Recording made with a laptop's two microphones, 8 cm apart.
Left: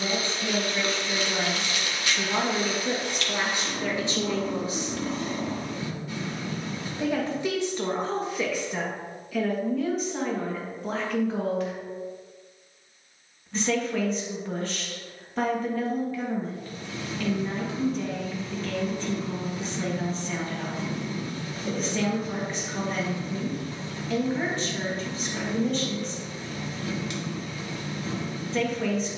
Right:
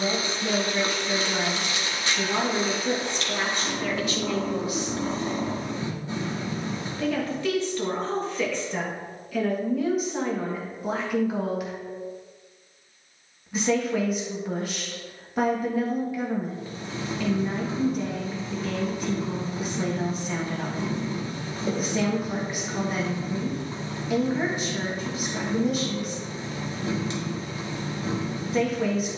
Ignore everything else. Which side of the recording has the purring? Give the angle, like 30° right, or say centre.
30° right.